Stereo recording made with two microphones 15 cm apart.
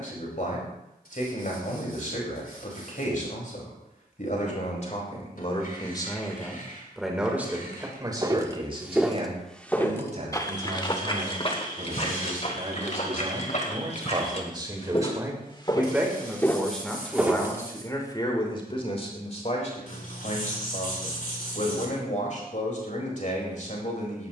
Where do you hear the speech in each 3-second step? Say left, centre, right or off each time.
left, left, centre, right, right, centre, left, left.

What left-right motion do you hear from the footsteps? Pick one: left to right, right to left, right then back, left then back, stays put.
left then back.